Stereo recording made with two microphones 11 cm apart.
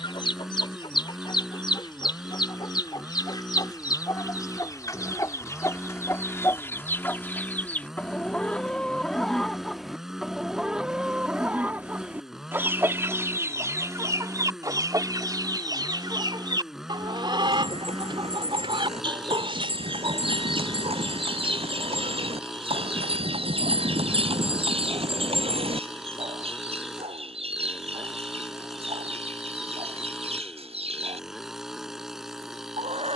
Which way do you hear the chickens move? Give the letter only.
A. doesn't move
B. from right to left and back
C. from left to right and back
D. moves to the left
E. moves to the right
E.